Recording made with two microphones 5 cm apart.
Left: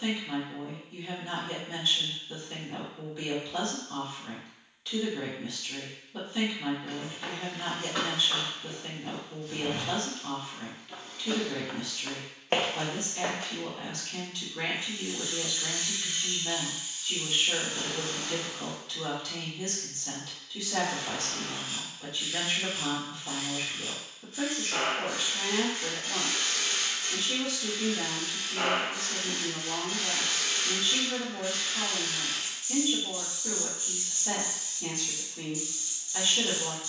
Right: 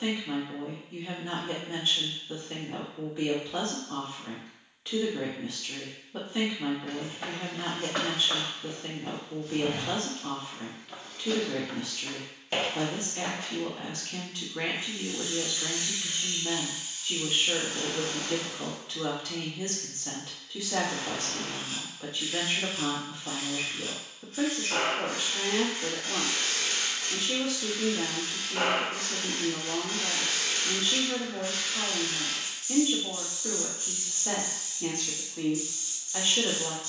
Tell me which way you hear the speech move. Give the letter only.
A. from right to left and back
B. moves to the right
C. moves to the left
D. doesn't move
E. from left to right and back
D.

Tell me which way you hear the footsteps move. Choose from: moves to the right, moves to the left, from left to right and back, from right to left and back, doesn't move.
moves to the left.